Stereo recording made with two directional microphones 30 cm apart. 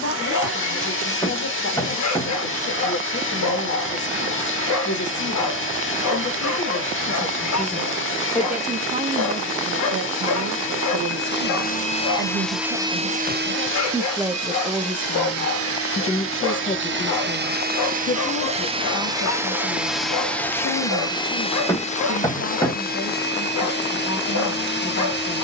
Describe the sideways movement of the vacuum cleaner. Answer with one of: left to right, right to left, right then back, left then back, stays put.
right then back.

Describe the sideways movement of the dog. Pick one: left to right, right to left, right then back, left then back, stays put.
stays put.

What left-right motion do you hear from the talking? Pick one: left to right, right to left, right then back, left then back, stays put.
right then back.